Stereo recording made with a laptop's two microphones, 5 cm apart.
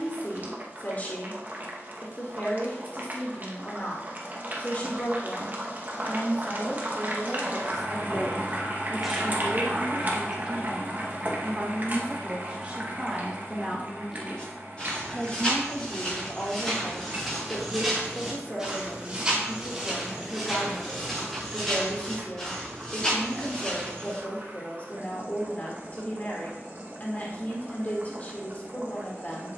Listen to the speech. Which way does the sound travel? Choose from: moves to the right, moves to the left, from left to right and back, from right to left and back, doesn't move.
from left to right and back.